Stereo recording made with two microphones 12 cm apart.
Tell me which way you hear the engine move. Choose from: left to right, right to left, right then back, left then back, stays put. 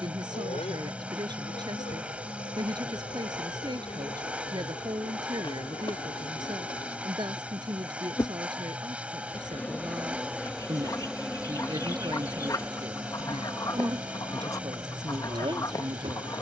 stays put.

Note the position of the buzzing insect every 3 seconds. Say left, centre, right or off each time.
left, left, left, centre, right, right.